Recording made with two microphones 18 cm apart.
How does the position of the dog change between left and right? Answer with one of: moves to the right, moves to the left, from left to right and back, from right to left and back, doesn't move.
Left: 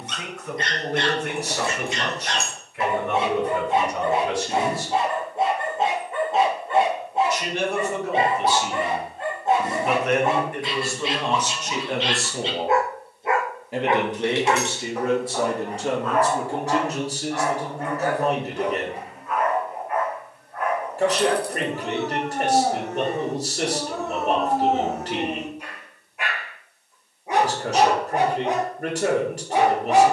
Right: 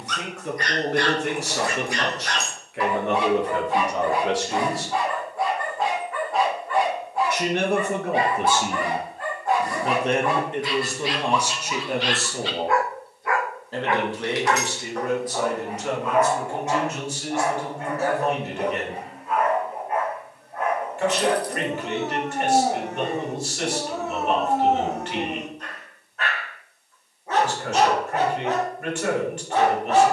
from left to right and back.